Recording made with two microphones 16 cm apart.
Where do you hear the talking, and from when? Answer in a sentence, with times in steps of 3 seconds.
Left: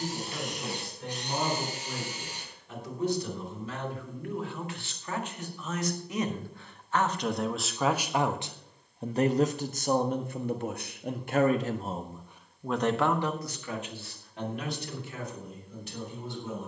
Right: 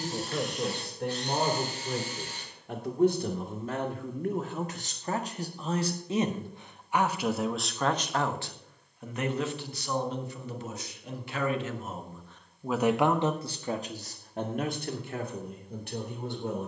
You can hear the talking on the right from 0 s, in the centre from 6 s, on the left from 9 s and on the right from 12 s.